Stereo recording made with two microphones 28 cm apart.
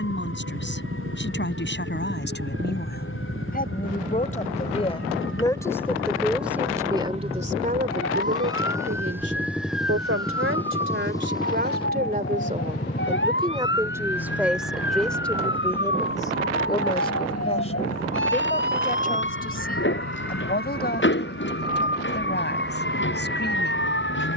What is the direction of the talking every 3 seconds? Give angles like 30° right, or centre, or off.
40° left, 20° left, 30° right, 50° right, 20° right, 10° left, 30° left, 40° left.